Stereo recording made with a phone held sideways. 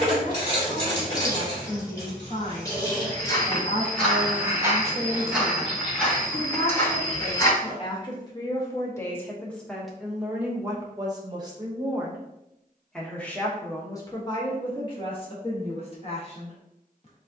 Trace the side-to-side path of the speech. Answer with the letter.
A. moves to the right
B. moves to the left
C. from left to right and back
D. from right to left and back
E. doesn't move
C.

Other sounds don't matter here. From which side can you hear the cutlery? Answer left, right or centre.
left.